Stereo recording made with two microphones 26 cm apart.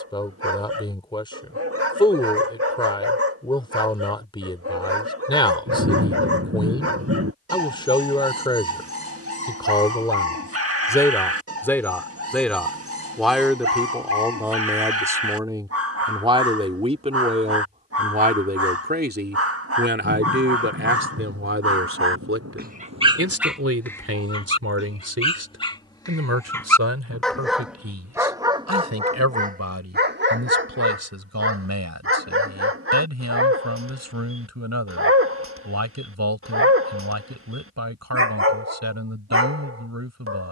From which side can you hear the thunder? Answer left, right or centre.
right.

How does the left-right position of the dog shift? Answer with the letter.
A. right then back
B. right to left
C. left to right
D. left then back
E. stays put
D.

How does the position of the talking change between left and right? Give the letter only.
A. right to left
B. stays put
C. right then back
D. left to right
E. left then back
D.